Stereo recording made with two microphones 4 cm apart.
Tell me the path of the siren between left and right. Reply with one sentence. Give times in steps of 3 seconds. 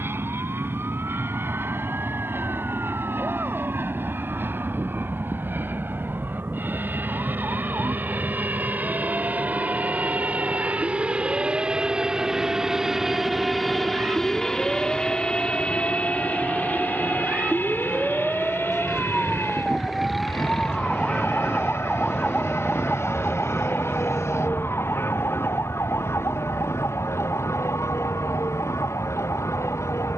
You can hear the siren on the right from 0 s, in the centre from 18 s and on the left from 21 s.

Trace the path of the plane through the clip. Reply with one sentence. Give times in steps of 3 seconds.
In this clip you hear the plane on the right from 0 s, in the centre from 12 s and on the left from 15 s.